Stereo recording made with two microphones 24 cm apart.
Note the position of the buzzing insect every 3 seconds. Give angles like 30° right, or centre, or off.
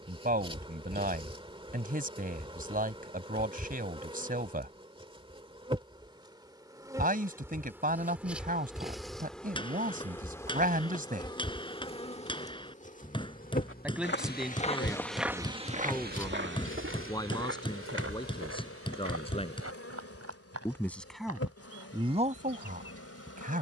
20° right, 20° right, 10° right, 10° left, 30° left, 60° left, 70° left, 70° left.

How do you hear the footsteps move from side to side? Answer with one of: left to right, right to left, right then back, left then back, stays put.
left to right.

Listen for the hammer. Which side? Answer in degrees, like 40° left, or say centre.
20° left.